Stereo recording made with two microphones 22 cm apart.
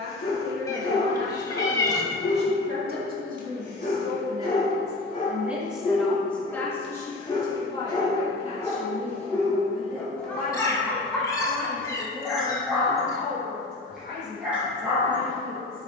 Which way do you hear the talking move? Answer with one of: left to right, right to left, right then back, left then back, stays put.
right to left.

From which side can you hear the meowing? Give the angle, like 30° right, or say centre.
20° left.